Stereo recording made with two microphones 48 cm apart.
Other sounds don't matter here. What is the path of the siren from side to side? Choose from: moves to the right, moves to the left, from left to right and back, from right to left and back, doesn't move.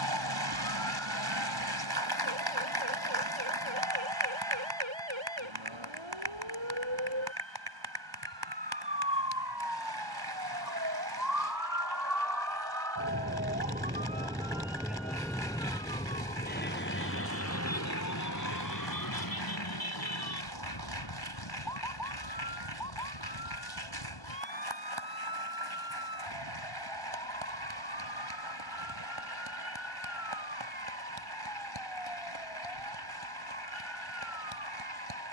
moves to the left.